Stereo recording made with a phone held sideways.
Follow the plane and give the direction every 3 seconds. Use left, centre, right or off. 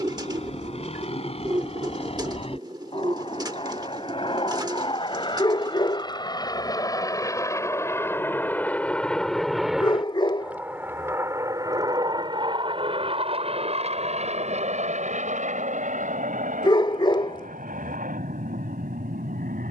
left, left, left, centre, right, right, right.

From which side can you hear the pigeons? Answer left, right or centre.
right.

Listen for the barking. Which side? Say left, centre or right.
left.